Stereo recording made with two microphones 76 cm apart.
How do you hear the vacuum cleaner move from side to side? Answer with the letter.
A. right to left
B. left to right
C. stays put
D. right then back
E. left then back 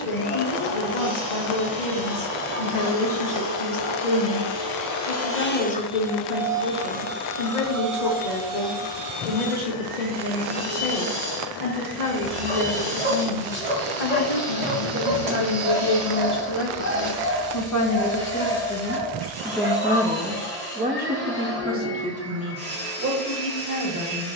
B.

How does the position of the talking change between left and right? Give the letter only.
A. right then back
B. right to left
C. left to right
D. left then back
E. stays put
C.